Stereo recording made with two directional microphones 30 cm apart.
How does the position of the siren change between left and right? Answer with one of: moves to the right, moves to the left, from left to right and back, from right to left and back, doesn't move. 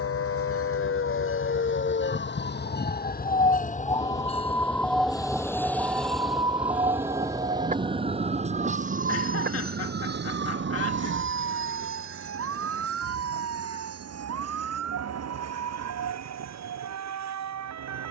moves to the right.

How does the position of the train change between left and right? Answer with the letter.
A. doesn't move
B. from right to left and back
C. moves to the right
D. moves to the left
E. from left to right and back
C.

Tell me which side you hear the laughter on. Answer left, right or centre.
left.